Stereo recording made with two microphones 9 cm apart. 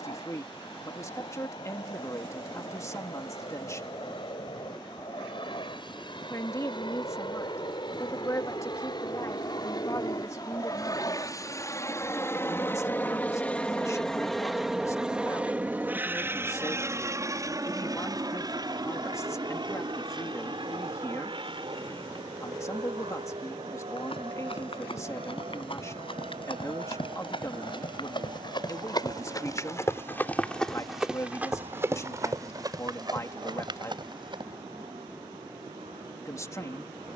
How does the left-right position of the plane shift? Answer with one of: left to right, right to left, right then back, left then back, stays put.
left to right.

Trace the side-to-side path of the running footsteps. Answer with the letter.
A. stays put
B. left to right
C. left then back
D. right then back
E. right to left
B.